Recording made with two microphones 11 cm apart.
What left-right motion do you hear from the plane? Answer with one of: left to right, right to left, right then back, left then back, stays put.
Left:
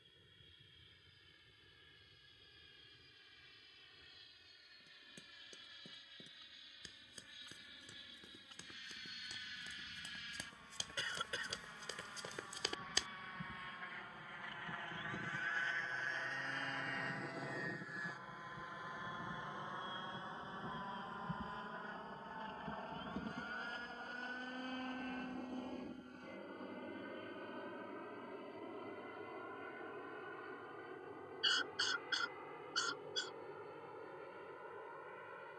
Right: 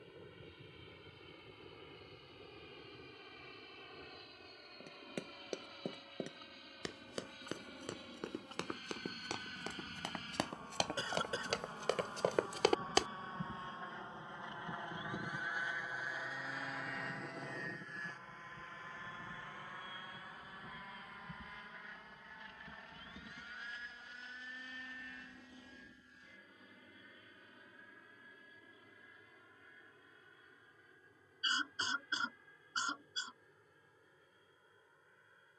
right to left.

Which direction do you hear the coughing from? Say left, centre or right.
right.